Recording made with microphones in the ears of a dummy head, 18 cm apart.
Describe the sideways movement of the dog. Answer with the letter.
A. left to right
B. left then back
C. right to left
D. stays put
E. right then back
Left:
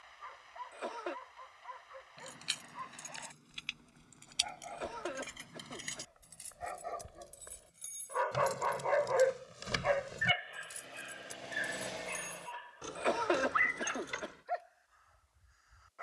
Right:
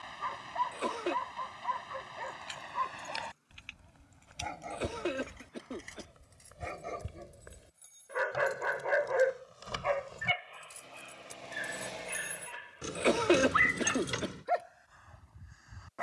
B.